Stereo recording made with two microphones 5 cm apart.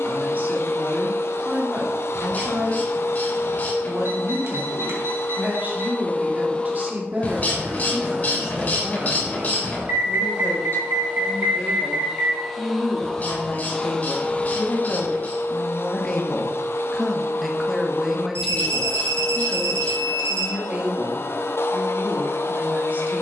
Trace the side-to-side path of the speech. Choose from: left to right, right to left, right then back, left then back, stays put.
left then back.